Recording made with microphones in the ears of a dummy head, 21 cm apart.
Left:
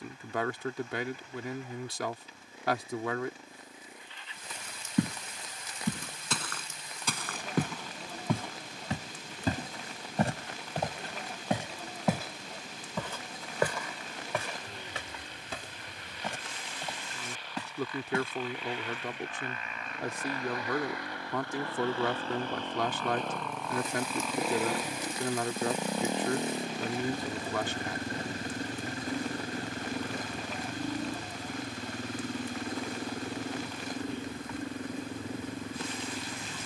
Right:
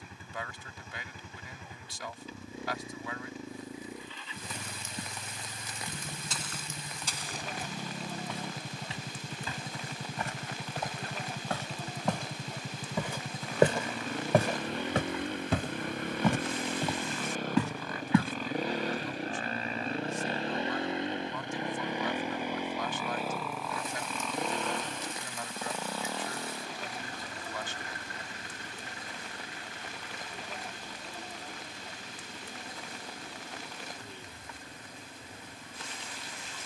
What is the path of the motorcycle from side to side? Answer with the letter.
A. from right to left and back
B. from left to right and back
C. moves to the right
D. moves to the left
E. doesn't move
D.